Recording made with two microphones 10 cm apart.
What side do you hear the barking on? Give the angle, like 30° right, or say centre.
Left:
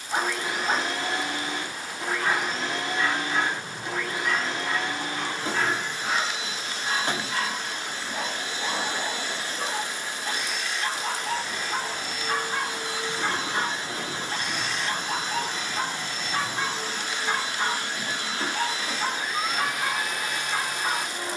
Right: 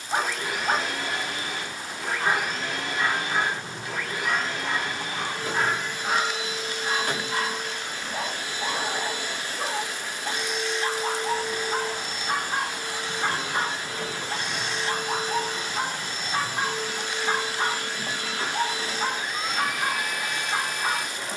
20° right.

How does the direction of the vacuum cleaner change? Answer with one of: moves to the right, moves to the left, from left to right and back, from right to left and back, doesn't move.
doesn't move.